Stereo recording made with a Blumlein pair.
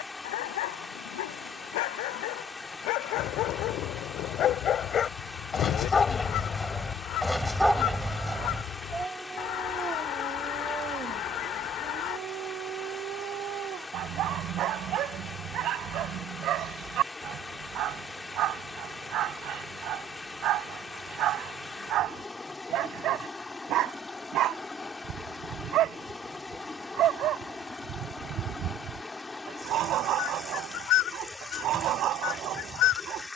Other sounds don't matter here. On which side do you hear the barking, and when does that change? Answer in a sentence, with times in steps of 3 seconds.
In this clip you hear the barking on the left from 0 s, in the centre from 6 s and on the right from 9 s.